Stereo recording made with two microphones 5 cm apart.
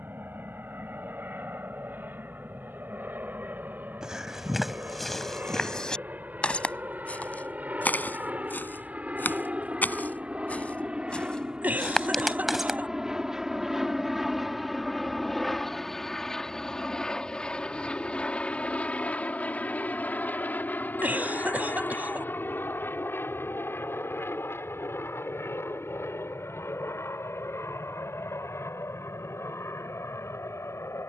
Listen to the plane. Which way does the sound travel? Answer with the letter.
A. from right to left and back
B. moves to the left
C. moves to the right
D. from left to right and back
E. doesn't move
B.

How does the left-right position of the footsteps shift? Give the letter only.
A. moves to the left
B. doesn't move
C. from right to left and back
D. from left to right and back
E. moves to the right
C.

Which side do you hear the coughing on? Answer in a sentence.
In this clip you hear the coughing on the right.